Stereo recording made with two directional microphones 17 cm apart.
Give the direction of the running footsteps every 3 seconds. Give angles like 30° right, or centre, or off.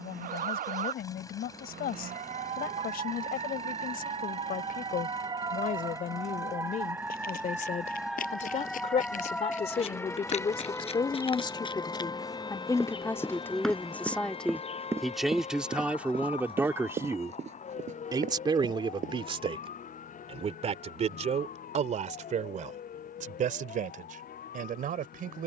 off, off, 60° left, 40° left, centre, 30° right, 50° right, off, off.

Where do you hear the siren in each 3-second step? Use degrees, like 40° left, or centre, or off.
50° right, 30° right, 10° right, 10° left, 30° left, 40° left, 50° left, 50° left, 50° left.